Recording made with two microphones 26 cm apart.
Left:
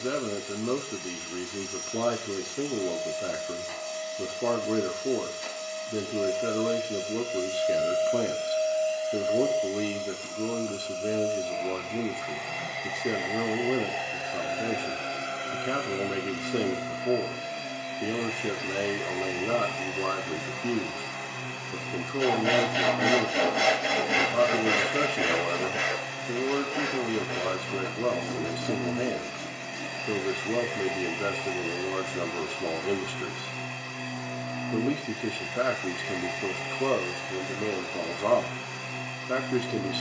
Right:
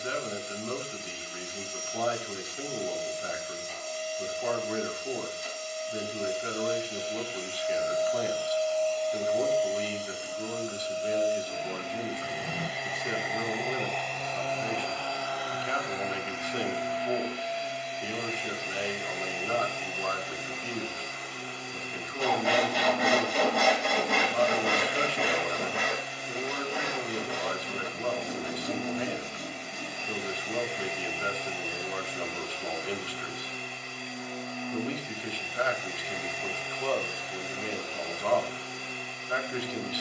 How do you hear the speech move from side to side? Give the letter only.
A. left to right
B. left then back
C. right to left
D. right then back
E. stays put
E.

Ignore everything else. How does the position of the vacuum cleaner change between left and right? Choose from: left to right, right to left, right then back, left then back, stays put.
right then back.